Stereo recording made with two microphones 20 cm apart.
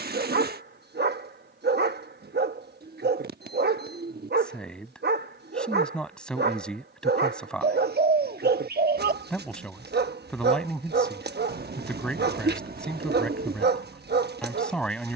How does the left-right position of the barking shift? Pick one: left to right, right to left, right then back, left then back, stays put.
stays put.